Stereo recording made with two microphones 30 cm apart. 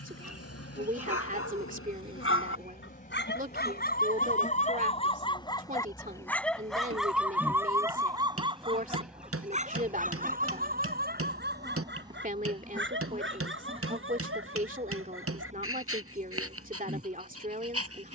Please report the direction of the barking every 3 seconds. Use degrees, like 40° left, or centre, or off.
50° left, 30° left, 10° right, 30° right, 40° right, 50° right.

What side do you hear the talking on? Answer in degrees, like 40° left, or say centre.
30° right.